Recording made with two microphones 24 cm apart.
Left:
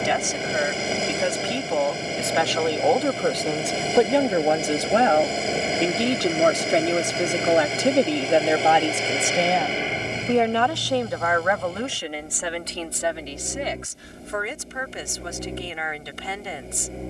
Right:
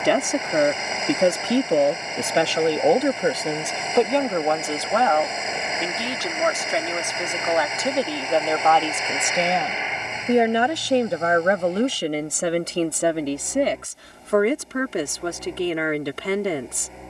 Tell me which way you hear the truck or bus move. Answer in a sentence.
In this clip you hear the truck or bus stay in one place.